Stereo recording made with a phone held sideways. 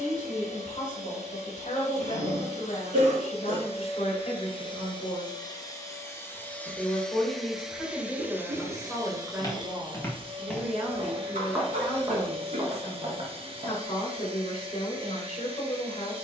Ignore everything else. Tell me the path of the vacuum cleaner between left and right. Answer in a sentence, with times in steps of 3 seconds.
You can hear the vacuum cleaner on the left from 0 s, in the centre from 6 s and on the right from 9 s.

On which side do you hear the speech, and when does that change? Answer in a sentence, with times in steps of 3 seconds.
You can hear the speech on the left from 0 s, in the centre from 6 s and on the left from 12 s.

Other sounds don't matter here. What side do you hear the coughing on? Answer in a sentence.
You can hear the coughing on the right.